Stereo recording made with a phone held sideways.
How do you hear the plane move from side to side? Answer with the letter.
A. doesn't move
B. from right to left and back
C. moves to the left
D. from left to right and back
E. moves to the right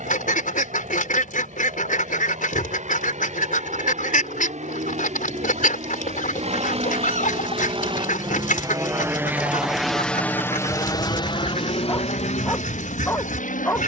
C.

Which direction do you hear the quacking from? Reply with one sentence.
You can hear the quacking on the left.